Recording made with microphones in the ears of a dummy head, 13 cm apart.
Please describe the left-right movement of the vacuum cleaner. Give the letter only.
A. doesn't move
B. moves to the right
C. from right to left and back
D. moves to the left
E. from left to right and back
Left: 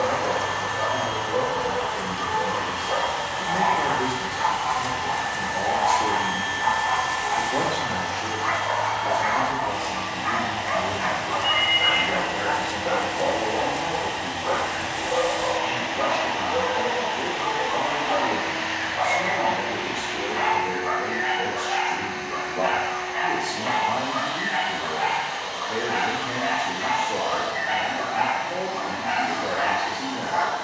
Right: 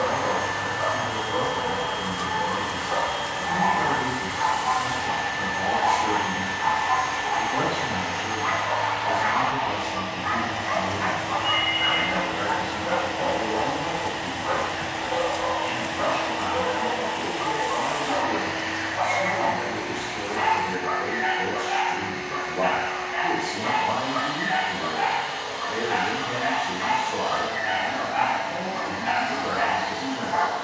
C.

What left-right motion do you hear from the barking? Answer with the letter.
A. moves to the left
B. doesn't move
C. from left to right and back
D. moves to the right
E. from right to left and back
D.